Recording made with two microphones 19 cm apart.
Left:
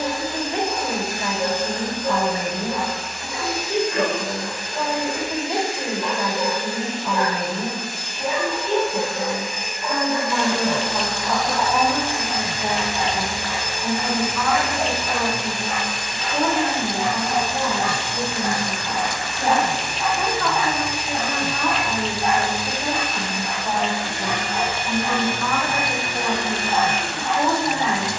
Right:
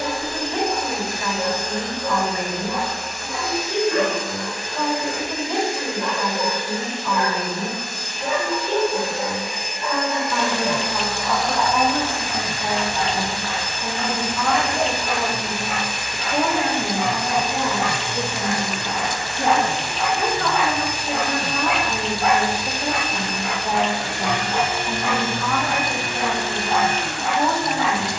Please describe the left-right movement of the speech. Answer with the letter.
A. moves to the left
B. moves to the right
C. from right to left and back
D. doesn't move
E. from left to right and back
E.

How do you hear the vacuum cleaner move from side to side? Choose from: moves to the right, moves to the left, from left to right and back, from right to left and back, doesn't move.
from right to left and back.